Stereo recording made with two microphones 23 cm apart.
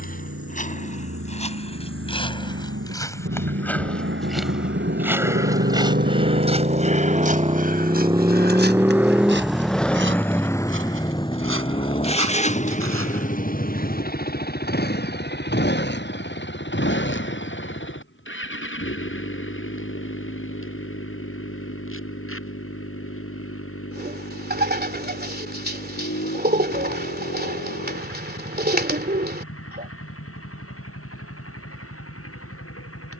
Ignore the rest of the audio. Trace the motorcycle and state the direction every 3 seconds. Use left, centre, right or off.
right, right, right, centre, left, left, left, left, left, left, left.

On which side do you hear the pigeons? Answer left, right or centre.
right.